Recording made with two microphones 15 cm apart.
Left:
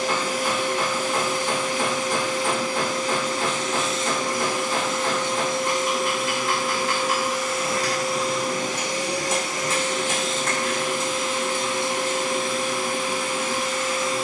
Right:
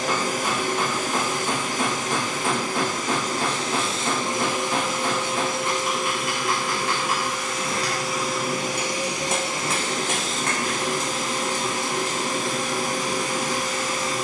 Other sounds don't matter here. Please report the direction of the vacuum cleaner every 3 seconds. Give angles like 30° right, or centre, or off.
40° right, 20° right, centre, 30° right, 40° right.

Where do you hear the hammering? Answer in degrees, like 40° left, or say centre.
60° right.